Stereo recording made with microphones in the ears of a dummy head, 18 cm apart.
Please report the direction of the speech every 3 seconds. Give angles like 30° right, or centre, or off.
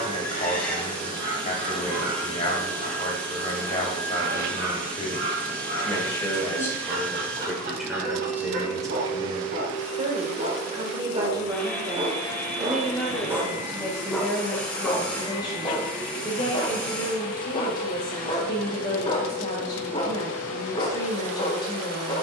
30° left, 30° left, centre, 20° right, 10° left, 20° left, 20° left, 20° left.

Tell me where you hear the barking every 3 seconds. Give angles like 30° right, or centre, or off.
50° right, 50° right, 50° right, 30° right, 10° right, 20° left, 30° left, 30° left.